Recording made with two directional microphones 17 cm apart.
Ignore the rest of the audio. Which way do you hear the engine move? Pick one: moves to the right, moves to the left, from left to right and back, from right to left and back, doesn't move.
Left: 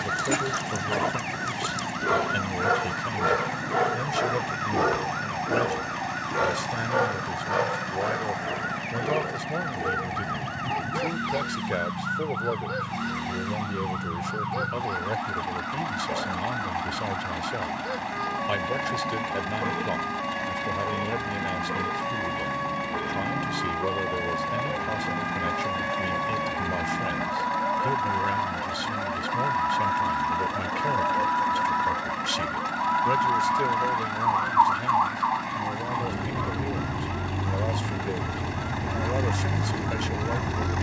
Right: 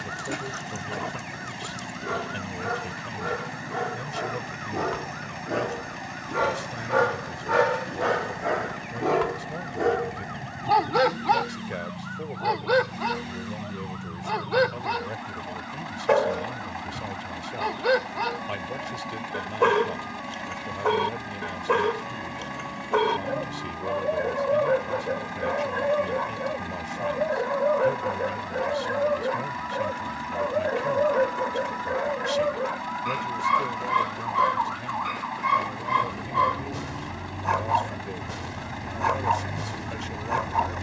doesn't move.